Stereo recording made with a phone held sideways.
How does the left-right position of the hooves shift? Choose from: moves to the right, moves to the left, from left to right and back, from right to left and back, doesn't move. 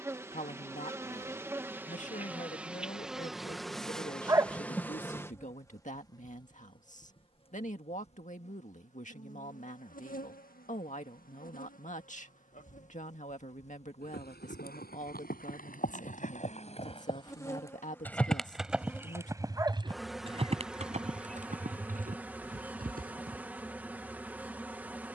moves to the right.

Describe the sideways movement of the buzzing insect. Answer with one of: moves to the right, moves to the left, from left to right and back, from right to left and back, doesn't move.
from right to left and back.